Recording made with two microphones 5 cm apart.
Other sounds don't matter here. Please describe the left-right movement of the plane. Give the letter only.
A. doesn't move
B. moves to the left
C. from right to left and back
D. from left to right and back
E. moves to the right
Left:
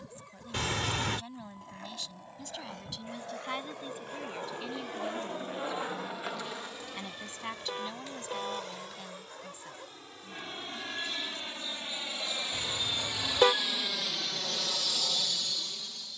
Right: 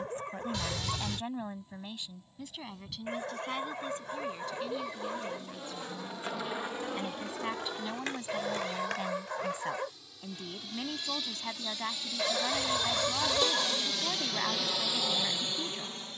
E.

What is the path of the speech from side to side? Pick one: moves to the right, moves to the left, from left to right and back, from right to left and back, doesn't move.
from right to left and back.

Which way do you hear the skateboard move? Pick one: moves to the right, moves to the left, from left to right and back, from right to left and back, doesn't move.
moves to the right.